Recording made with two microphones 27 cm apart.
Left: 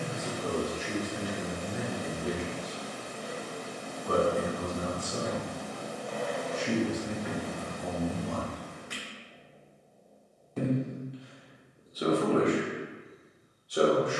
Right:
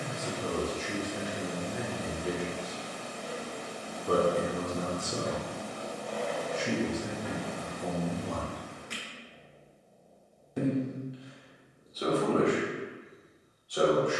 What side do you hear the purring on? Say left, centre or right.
centre.